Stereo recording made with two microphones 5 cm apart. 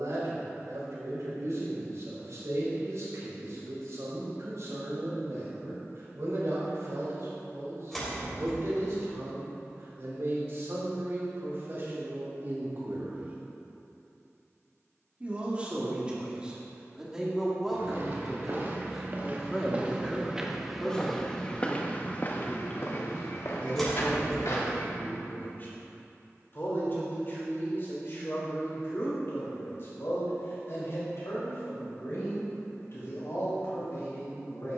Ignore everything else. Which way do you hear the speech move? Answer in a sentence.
You can hear the speech move to the left.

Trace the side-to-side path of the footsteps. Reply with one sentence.
In this clip you hear the footsteps go from the right side to the left.